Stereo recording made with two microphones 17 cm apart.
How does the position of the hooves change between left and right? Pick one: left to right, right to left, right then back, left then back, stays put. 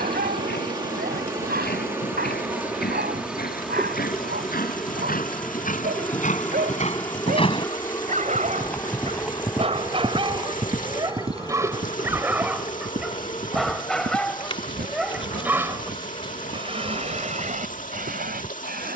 left to right.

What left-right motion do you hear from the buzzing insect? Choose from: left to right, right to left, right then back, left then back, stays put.
right to left.